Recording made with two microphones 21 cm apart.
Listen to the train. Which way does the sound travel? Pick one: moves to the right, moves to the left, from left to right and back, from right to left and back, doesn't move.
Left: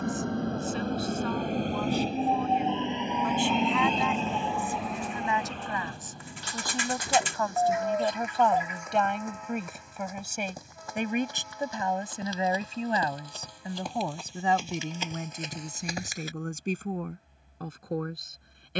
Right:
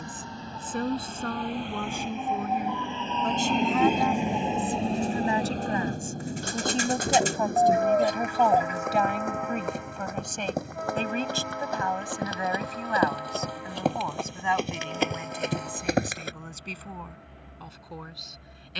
moves to the right.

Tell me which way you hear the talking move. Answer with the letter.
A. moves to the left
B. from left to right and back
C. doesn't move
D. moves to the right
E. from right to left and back
A.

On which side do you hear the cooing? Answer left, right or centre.
right.